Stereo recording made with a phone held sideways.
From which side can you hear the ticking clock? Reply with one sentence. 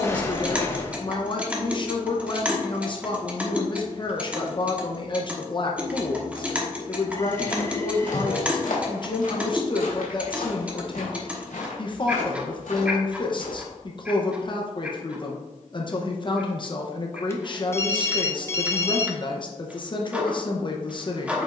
In this clip you hear the ticking clock in the centre.